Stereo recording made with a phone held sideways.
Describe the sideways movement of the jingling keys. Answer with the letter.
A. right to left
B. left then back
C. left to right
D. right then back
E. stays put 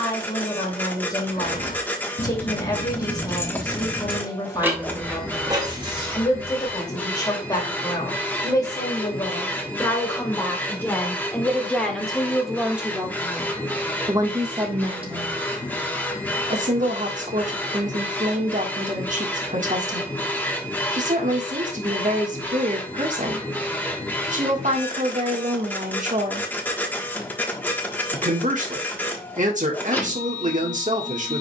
C.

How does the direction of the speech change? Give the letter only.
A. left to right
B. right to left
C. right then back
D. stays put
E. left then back
A.